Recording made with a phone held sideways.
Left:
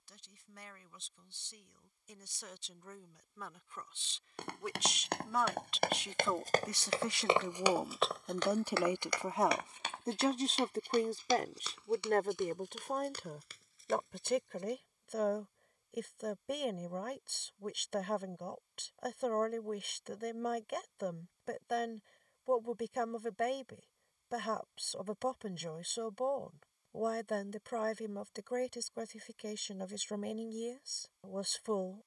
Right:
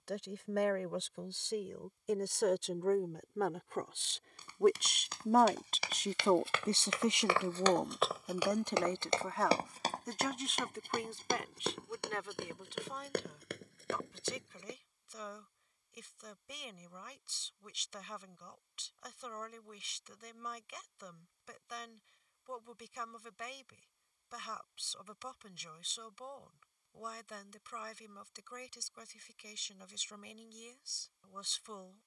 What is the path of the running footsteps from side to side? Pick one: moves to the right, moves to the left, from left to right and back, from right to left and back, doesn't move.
moves to the right.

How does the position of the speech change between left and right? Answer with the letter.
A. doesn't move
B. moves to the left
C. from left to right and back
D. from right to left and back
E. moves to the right
B.